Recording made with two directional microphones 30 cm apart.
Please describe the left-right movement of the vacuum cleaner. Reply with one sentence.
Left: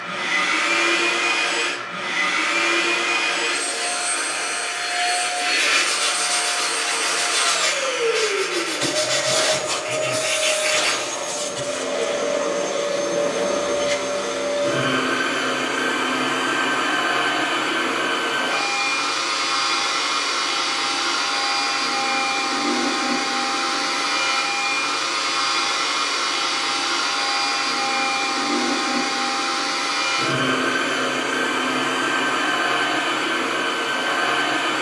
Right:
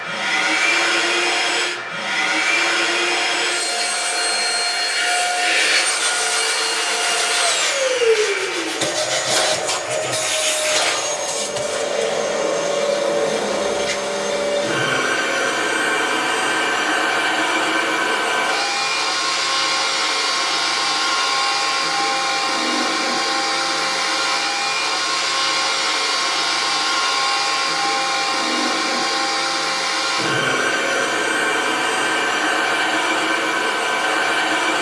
You can hear the vacuum cleaner stay put.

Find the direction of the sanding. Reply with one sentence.
In this clip you hear the sanding in the centre.